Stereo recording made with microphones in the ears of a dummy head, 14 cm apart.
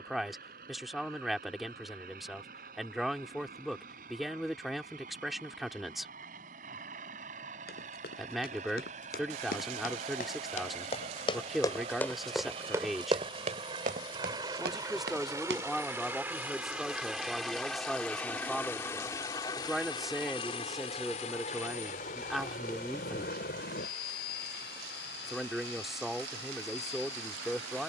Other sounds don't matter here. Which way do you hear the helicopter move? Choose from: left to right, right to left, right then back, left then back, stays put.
right to left.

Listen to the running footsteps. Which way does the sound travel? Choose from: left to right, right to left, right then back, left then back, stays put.
left to right.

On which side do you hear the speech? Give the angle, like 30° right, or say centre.
centre.